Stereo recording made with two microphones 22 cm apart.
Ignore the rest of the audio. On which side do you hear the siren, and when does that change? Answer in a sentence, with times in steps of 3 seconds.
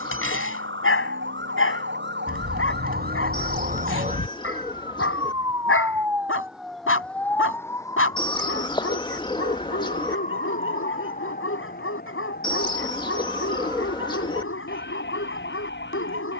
In this clip you hear the siren on the right from 0 s, in the centre from 6 s and on the left from 9 s.